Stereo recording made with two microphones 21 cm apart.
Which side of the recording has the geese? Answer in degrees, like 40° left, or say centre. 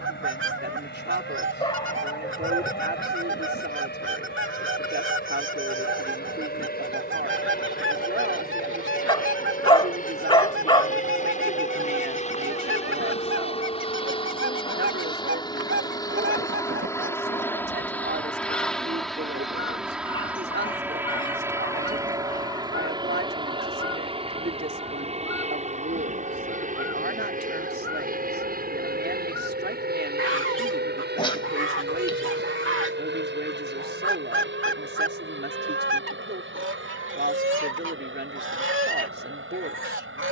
70° right.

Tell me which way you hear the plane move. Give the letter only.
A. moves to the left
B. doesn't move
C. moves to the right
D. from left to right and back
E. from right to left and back
C.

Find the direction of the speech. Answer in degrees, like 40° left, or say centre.
60° right.